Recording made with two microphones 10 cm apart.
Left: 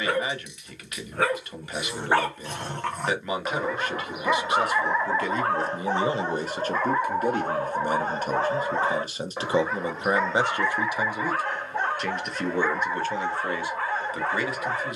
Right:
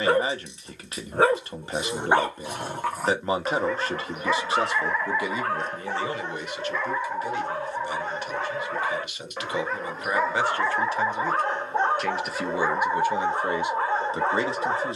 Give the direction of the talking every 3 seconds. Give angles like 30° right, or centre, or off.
30° right, 20° right, 40° left, 20° left, 20° right.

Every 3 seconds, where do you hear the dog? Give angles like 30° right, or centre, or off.
20° right, 20° left, 40° left, 10° right, 20° right.